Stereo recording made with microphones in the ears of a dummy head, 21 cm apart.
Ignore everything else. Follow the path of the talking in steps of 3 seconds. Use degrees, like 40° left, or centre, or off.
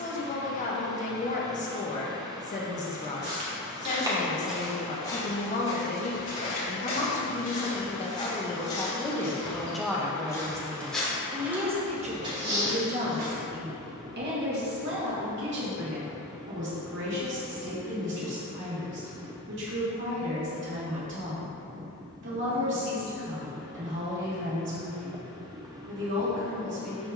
30° left, 30° left, 30° left, 10° right, 40° right, 60° right, 60° right, 60° right, 60° right.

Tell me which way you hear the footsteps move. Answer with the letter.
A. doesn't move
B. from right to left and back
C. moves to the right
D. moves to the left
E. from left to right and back
B.